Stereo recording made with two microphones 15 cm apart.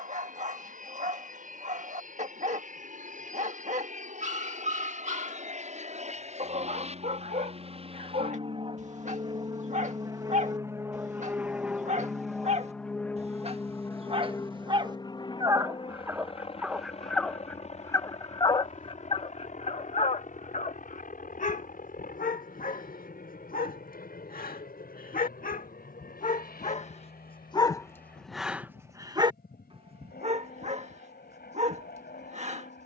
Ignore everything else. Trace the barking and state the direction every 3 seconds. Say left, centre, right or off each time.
right, right, right, right, right, centre, left, left, left, centre, right.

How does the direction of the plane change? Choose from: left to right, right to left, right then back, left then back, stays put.
right to left.